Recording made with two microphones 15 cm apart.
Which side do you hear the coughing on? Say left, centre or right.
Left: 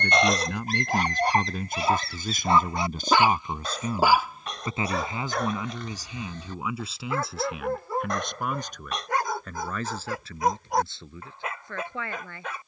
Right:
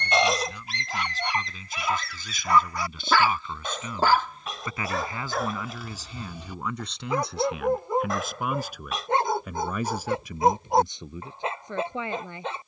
centre.